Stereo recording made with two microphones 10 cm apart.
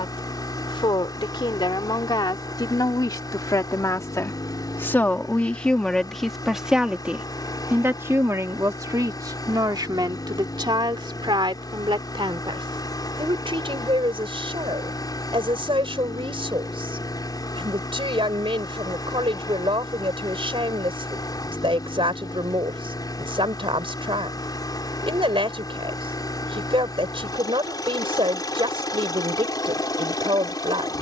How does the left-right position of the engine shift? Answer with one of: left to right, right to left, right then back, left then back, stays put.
stays put.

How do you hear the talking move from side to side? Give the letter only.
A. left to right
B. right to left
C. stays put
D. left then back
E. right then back
A.